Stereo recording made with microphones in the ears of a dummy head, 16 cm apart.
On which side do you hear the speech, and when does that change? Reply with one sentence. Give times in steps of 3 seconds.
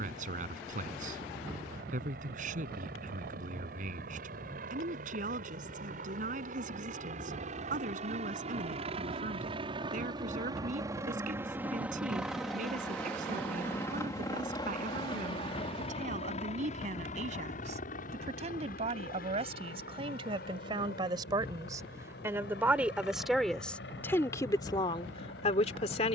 You can hear the speech on the right from 0 s, in the centre from 21 s and on the left from 24 s.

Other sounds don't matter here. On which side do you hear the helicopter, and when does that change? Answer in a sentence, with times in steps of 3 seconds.
In this clip you hear the helicopter on the right from 0 s, in the centre from 12 s and on the left from 15 s.